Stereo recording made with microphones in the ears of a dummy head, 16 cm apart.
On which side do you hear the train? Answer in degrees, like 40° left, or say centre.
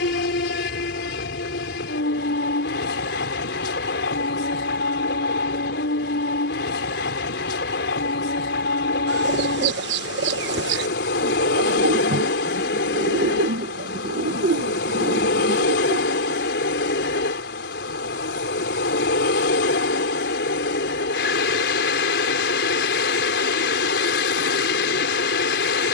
80° left.